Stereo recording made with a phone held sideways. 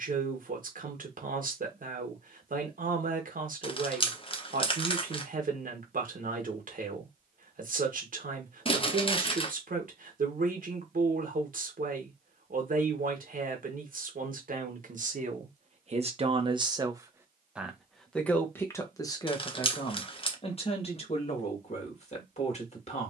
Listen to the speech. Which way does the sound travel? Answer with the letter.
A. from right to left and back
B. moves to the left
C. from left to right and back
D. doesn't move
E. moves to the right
B.